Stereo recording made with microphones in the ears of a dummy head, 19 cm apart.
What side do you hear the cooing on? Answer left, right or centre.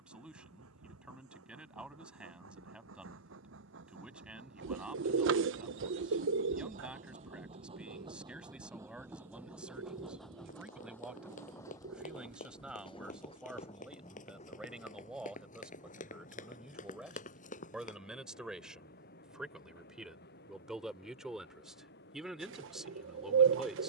right.